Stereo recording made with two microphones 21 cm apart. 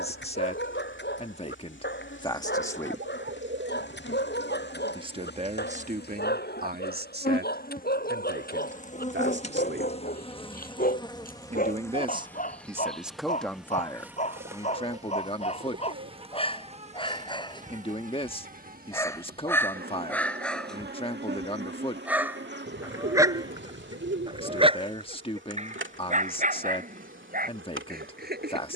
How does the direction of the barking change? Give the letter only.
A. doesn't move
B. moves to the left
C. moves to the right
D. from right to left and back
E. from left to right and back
C.